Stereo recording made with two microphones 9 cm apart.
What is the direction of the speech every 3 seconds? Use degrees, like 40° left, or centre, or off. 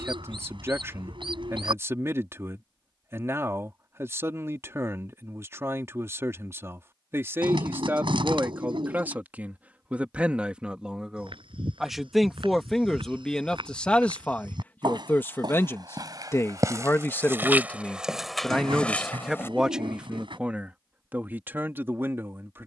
30° right, 30° right, 30° right, 10° right, 10° left, 20° left, 10° right, 20° right.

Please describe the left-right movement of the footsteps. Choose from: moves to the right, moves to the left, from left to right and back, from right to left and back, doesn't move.
moves to the left.